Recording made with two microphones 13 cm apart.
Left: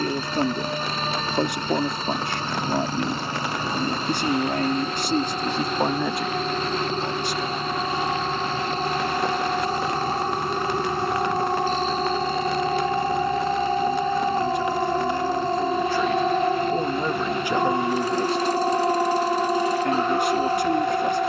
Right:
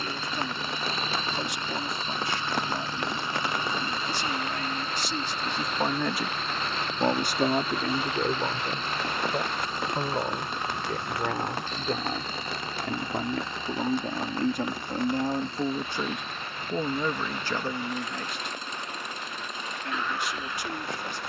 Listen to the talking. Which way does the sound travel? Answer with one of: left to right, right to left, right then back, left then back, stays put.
right then back.